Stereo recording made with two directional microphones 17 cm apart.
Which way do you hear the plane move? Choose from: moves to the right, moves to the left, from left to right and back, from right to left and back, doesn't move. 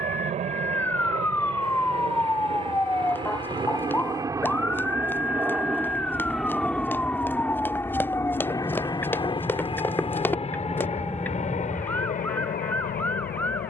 moves to the left.